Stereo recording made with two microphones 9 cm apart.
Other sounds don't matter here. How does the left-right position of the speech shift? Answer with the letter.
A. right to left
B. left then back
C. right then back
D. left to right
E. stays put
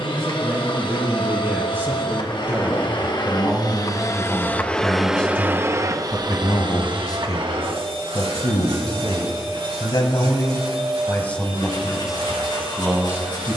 B.